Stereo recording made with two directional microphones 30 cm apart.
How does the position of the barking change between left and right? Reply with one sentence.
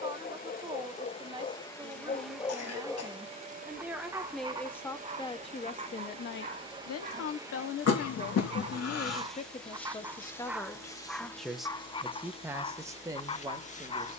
You can hear the barking move from left to right and back again.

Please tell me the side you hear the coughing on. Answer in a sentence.
In this clip you hear the coughing on the left.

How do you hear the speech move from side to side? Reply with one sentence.
In this clip you hear the speech move from right to left and back again.